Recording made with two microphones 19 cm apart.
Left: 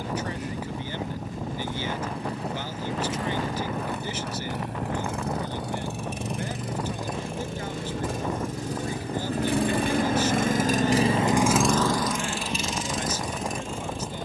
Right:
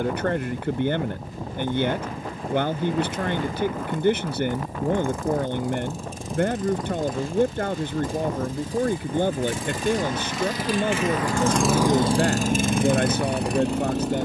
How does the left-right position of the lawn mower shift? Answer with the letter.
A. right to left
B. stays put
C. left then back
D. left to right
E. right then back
D.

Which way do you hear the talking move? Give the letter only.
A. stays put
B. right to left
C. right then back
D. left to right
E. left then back
A.